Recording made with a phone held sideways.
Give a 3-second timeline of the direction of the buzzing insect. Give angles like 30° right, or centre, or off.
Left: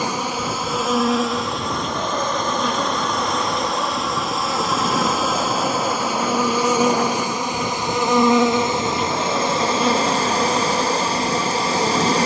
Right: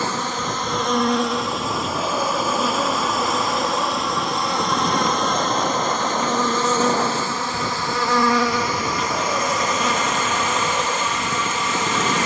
centre, centre, 20° left, 30° left.